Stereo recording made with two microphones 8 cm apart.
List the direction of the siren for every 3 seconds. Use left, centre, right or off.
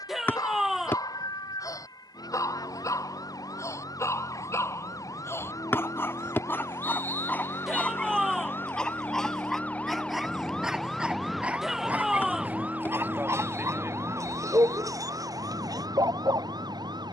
left, left, left, centre, right, right.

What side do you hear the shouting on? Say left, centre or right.
centre.